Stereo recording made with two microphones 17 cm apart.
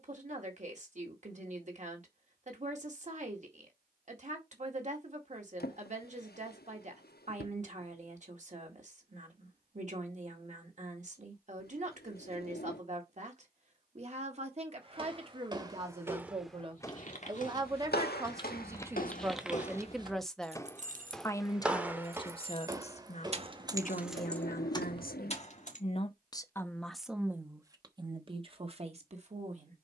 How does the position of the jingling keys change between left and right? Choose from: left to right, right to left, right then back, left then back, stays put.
right then back.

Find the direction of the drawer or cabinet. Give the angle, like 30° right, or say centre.
70° left.